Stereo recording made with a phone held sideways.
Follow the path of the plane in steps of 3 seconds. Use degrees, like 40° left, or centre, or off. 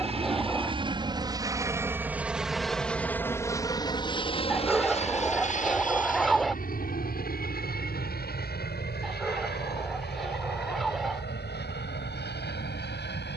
20° right, 30° left, 60° left, 70° left, 80° left.